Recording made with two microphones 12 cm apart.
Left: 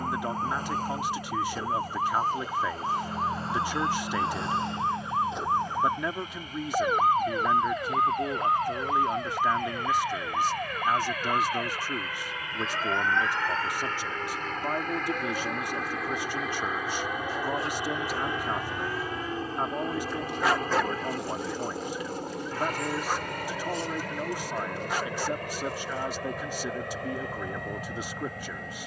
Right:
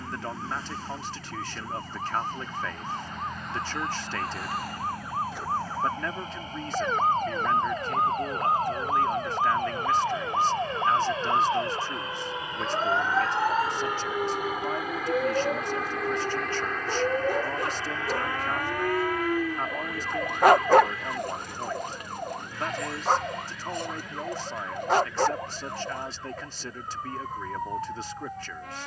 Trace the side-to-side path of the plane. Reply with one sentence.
You can hear the plane move from right to left.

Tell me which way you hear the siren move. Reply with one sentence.
In this clip you hear the siren travel towards the right.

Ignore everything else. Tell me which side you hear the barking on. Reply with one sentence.
You can hear the barking on the right.